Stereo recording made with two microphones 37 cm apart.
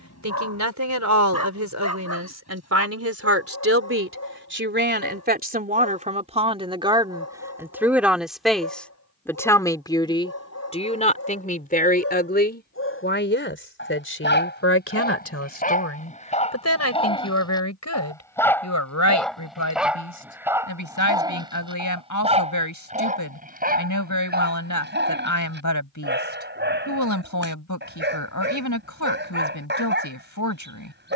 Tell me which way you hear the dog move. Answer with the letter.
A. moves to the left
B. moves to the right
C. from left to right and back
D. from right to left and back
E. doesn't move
B.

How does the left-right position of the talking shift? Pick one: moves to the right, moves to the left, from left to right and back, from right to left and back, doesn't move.
moves to the left.